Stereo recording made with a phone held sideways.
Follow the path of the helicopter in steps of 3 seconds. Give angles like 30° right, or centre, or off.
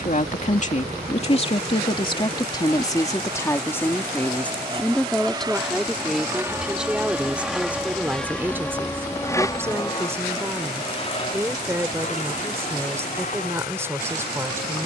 50° right, 30° right, centre, 30° left, 50° left.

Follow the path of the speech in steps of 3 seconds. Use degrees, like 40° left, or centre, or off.
40° left, 10° left, 10° right, 10° right, 10° right.